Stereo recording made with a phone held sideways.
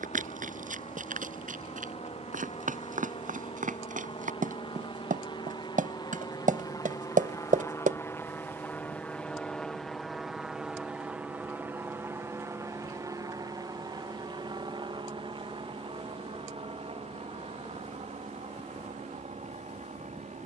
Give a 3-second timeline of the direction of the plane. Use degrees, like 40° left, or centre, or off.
60° left, 40° left, 20° left, centre, 30° right, 40° right, 50° right.